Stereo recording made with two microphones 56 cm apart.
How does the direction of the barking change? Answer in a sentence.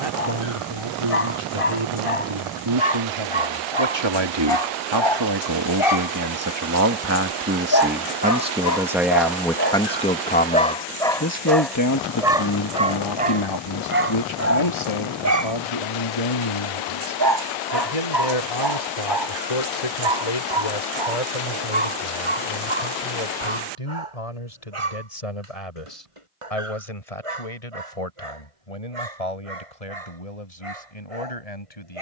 You can hear the barking travel towards the right.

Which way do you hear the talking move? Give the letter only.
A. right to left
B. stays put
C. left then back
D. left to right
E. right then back
A.